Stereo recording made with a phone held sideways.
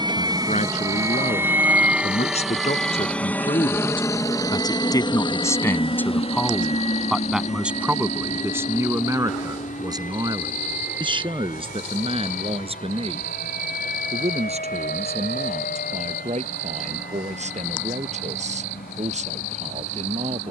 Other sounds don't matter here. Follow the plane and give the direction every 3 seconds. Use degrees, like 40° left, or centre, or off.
10° right, 30° left, 50° left, 60° left, 70° left, 70° left, 80° left.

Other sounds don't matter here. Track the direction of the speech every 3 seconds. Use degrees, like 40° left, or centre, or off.
60° left, 30° left, 10° right, 30° right, 50° right, 50° right, 60° right.